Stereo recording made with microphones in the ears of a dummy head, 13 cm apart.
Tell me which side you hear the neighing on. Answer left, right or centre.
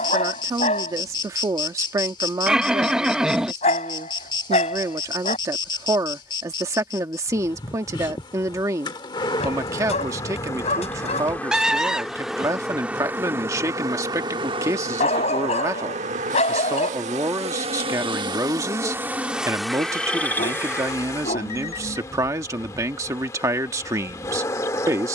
centre.